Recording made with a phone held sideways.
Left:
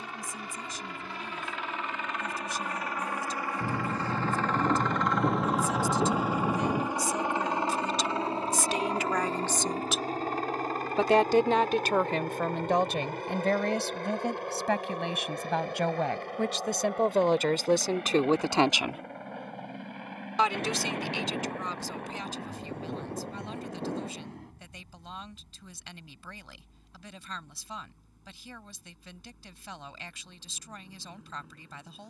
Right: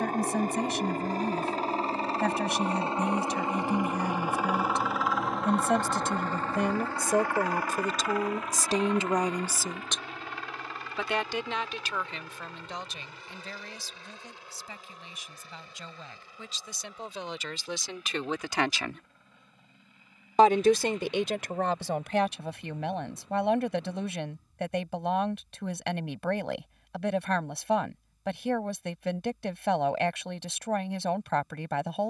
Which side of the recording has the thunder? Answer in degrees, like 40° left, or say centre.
60° left.